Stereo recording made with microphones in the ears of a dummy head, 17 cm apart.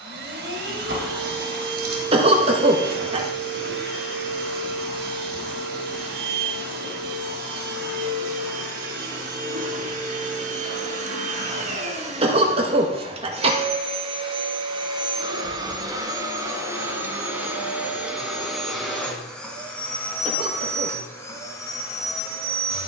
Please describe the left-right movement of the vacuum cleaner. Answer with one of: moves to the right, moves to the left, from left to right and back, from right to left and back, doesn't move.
moves to the left.